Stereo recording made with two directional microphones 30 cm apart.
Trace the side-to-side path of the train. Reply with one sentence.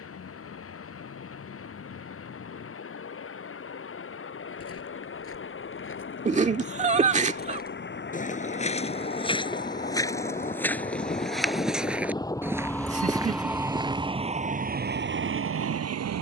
In this clip you hear the train travel towards the right.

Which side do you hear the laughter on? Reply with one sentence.
You can hear the laughter on the right.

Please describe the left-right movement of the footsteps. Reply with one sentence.
You can hear the footsteps move to the right.